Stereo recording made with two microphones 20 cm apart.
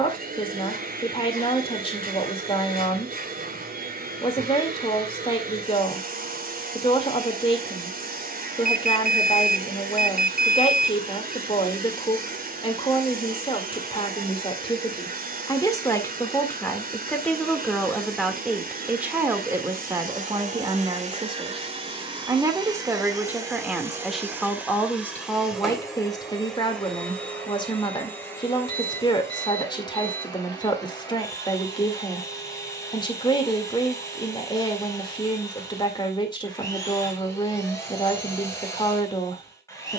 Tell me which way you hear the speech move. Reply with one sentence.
In this clip you hear the speech go right and come back.